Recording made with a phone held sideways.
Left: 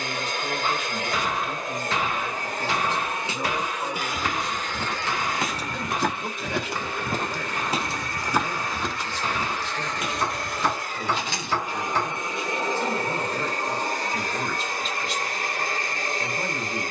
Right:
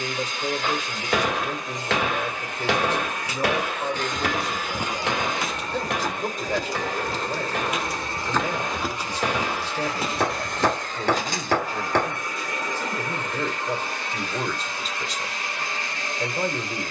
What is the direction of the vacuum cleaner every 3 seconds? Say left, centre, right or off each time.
left, centre, right, centre, left, left.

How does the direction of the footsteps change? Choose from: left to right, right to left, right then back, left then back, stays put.
left then back.